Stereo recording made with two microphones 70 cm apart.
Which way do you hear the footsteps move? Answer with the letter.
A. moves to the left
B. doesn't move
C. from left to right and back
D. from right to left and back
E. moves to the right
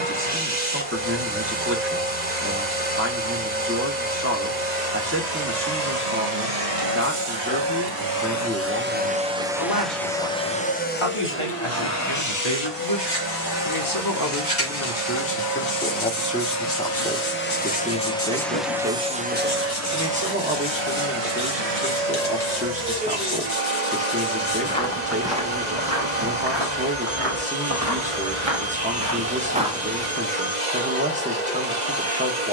C.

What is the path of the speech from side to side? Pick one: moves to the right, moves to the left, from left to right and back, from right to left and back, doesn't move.
from right to left and back.